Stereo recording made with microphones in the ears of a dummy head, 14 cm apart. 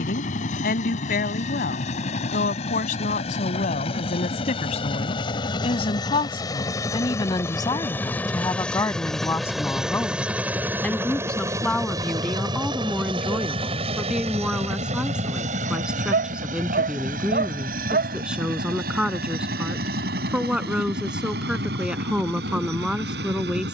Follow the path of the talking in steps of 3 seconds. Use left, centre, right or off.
left, left, left, centre, centre, centre, centre, centre.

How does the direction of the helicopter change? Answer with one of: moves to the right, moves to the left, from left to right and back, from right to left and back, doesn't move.
moves to the right.